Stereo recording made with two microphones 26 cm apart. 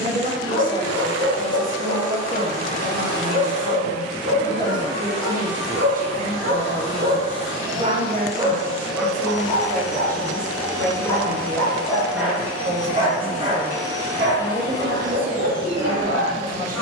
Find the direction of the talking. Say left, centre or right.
right.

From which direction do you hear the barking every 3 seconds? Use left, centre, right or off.
right, right, right, centre, right, right.